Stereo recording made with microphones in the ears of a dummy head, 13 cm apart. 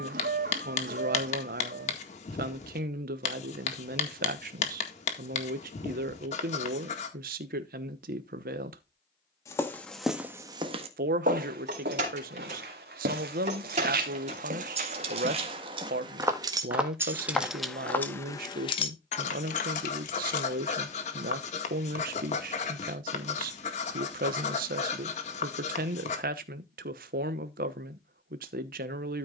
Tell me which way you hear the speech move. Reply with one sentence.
You can hear the speech stay in one place.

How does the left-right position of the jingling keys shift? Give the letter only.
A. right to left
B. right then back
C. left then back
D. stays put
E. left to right
A.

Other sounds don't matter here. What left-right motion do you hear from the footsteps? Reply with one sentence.
You can hear the footsteps go right and come back.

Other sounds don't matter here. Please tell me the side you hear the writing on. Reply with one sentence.
In this clip you hear the writing on the left.